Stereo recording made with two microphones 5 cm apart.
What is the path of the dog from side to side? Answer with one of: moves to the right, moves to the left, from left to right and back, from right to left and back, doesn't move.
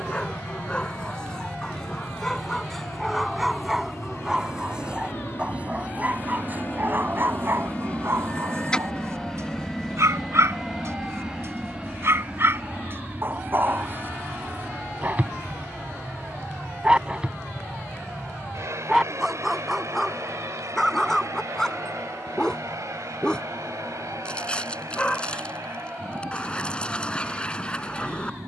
from left to right and back.